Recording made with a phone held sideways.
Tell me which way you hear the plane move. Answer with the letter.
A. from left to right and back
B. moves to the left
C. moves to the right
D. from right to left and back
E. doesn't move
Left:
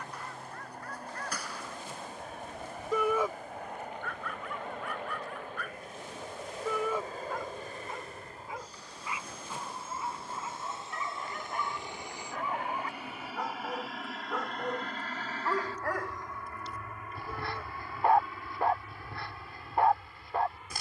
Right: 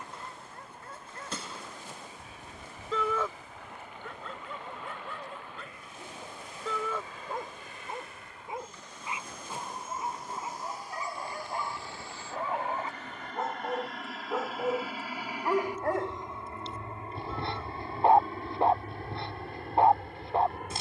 C.